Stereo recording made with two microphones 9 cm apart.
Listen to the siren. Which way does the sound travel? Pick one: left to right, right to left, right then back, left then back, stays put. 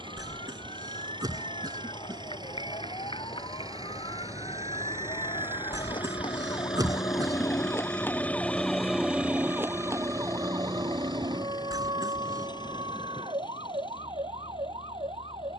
left to right.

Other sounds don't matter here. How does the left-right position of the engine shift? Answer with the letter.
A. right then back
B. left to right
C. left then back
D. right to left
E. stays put
D.